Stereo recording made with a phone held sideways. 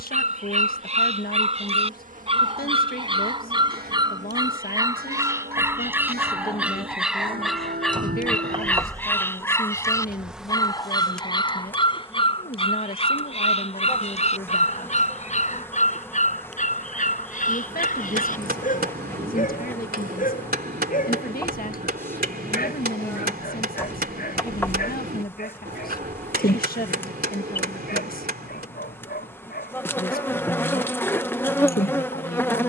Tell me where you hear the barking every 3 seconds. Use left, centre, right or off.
right, right, centre, left, left, left, left, left, left, left, left.